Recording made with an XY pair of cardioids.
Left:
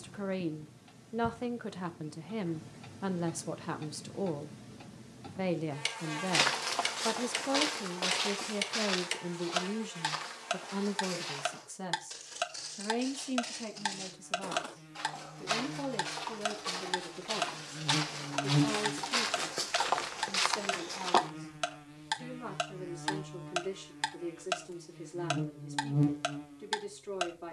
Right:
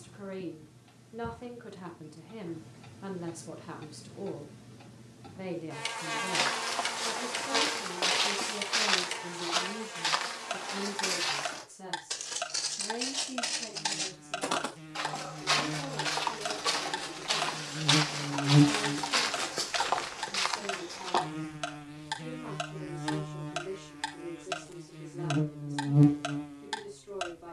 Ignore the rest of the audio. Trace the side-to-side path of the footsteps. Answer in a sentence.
You can hear the footsteps move from left to right and back again.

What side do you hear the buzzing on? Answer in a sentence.
In this clip you hear the buzzing on the right.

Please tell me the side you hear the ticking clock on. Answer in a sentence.
In this clip you hear the ticking clock on the left.